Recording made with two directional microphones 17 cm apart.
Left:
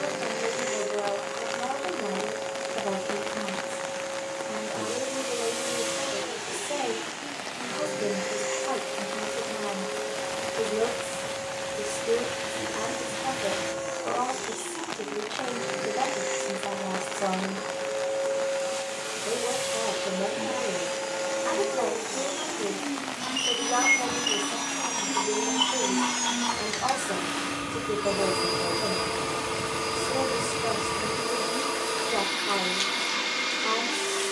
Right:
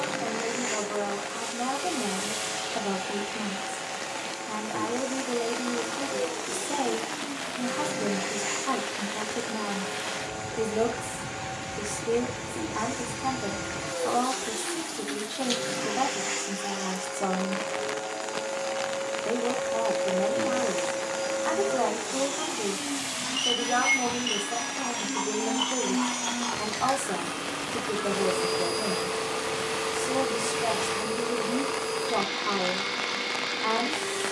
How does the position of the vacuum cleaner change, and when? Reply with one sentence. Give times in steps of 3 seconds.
You can hear the vacuum cleaner on the right from 0 s and in the centre from 21 s.